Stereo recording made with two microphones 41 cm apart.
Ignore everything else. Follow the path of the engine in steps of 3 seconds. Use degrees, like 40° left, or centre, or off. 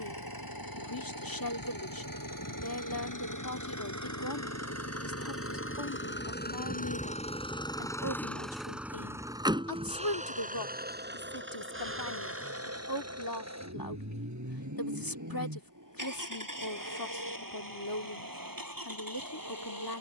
60° left, 40° left, 10° left, 20° right, 40° right, 50° right, 60° right.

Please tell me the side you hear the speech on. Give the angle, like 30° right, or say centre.
60° left.